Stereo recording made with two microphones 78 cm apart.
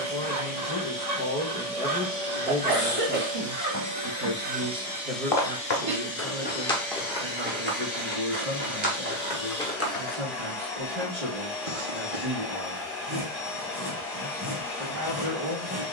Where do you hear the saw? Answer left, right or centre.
right.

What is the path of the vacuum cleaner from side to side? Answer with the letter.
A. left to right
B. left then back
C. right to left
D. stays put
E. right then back
C.